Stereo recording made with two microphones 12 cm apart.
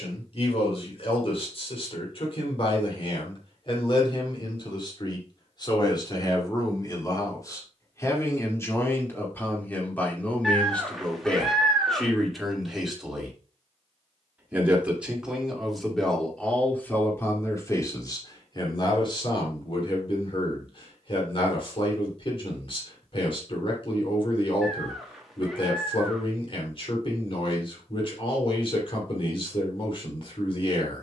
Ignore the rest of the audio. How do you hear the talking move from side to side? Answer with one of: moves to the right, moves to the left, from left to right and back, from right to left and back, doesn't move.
from left to right and back.